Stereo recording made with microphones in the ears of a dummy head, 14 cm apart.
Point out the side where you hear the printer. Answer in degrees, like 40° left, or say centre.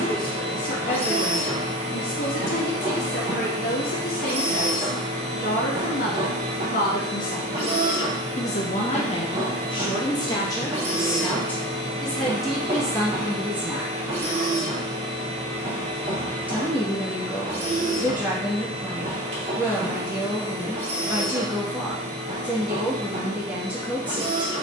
40° right.